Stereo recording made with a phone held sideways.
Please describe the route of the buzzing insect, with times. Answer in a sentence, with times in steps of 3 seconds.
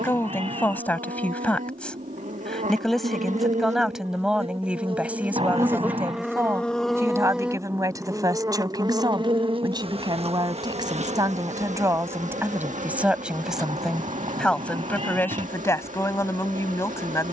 In this clip you hear the buzzing insect on the right from 0 s, in the centre from 6 s and on the right from 9 s.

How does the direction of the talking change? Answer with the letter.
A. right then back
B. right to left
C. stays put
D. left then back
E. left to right
A.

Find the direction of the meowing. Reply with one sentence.
In this clip you hear the meowing on the right.